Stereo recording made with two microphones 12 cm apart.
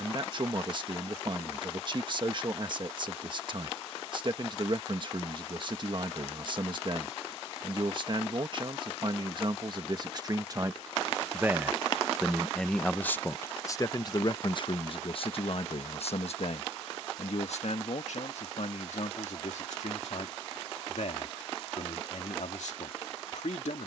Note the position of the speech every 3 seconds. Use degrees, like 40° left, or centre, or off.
40° right, 40° right, 40° right, 30° right, 20° left, 60° left, 80° left, 80° left.